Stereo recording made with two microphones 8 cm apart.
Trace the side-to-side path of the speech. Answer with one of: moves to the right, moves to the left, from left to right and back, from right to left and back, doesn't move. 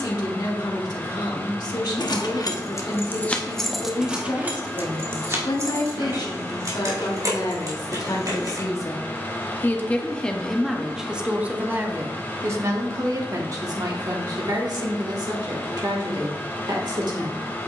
moves to the right.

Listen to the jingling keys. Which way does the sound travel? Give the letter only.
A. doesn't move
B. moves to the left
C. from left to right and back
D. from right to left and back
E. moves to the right
E.